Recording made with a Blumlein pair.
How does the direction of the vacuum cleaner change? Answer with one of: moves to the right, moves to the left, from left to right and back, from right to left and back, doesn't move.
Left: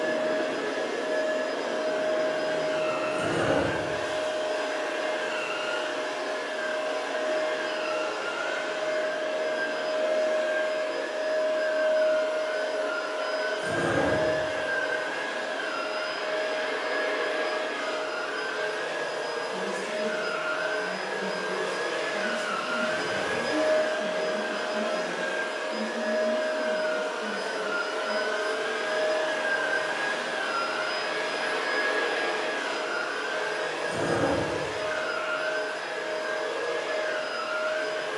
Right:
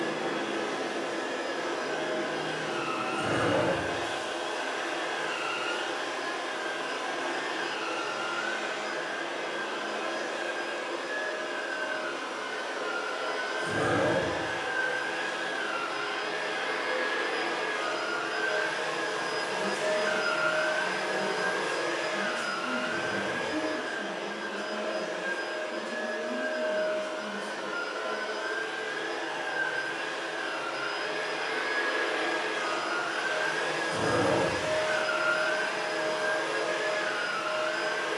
from right to left and back.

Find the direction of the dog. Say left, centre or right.
centre.